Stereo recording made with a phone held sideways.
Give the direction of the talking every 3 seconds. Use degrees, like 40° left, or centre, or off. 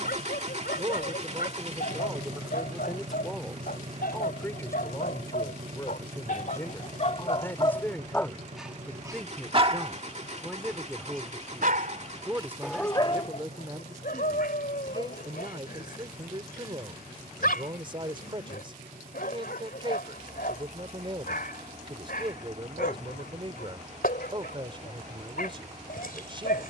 20° right, 10° left, 10° left, centre, 20° right, 30° right, 30° right, 30° right, 30° right.